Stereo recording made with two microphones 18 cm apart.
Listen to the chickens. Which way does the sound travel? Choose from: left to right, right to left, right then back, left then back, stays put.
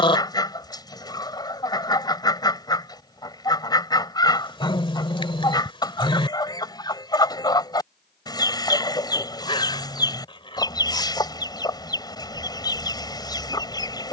stays put.